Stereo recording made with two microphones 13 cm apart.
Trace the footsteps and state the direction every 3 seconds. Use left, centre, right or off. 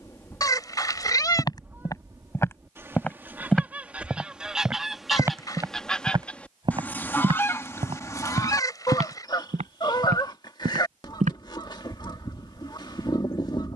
left, centre, right, right, off.